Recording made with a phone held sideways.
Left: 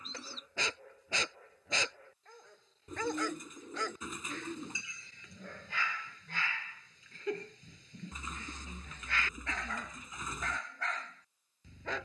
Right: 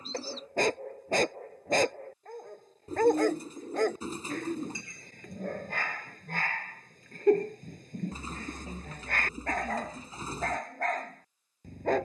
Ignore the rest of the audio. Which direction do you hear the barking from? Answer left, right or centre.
right.